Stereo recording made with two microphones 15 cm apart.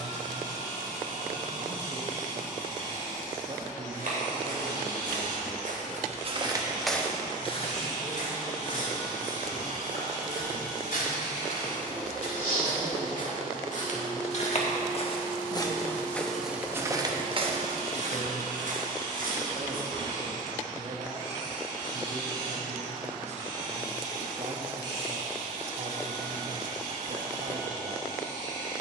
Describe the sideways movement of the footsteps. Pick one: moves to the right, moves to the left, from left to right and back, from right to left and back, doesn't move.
from right to left and back.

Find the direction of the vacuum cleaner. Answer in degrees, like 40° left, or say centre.
60° right.